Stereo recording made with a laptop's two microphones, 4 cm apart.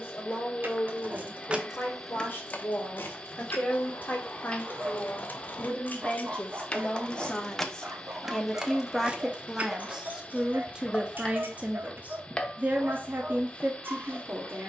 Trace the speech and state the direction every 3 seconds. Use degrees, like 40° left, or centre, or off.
50° left, 40° left, 20° left, 20° right, 50° right.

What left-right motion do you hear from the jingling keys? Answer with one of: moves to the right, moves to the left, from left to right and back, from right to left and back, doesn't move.
from right to left and back.